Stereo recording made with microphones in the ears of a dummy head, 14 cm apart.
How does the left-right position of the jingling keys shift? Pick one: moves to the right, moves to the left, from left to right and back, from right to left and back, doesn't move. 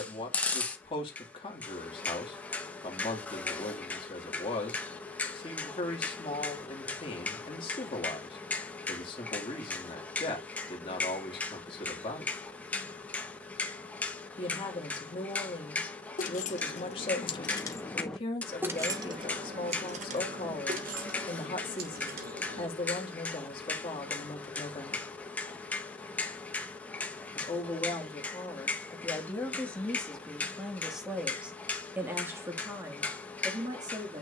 moves to the right.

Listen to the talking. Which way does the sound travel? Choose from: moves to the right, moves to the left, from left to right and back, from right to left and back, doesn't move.
moves to the right.